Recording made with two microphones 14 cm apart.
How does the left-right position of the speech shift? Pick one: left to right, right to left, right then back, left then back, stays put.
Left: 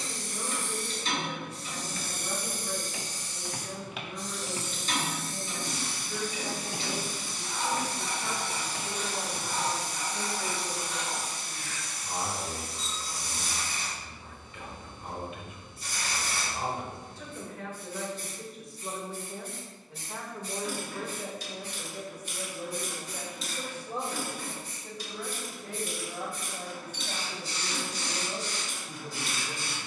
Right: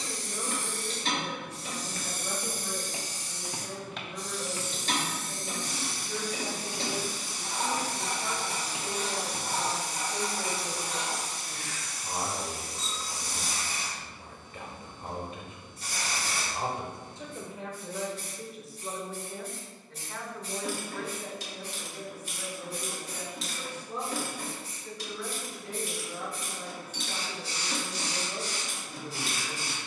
right to left.